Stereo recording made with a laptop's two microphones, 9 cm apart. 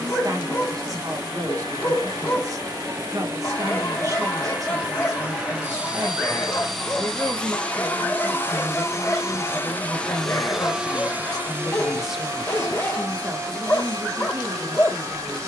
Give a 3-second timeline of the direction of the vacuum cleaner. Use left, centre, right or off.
right, right, centre, centre, right.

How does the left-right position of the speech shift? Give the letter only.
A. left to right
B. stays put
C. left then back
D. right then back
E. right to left
C.